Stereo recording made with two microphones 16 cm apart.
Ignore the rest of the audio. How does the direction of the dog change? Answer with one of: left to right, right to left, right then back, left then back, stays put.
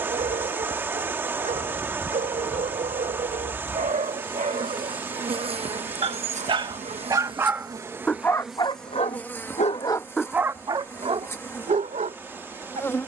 left then back.